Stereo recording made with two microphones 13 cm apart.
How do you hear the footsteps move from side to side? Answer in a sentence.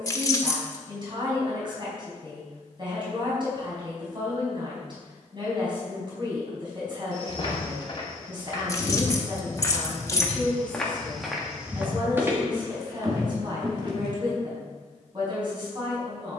You can hear the footsteps travel towards the right.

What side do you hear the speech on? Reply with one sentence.
In this clip you hear the speech on the right.